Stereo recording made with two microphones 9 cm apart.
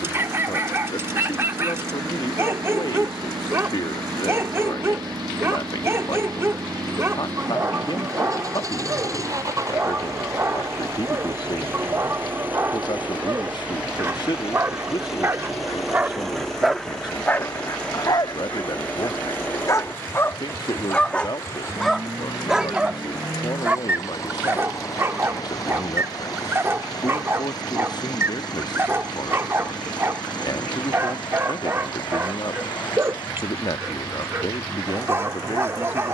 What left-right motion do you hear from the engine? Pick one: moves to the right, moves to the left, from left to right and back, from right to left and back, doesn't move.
moves to the left.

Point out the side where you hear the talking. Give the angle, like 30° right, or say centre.
50° left.